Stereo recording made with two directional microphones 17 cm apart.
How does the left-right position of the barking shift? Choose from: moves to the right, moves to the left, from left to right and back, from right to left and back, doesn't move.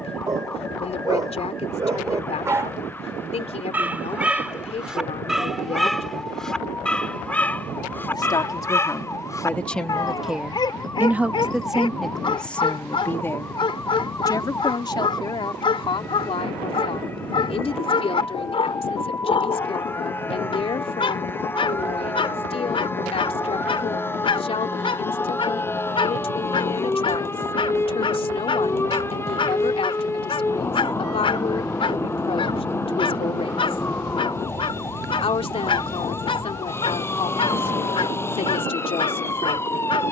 moves to the left.